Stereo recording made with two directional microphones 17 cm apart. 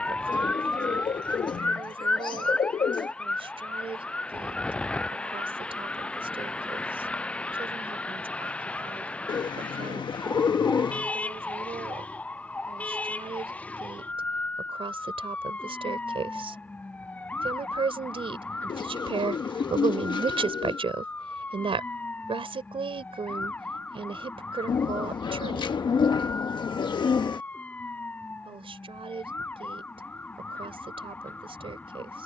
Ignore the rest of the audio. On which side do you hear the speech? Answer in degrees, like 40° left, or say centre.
30° right.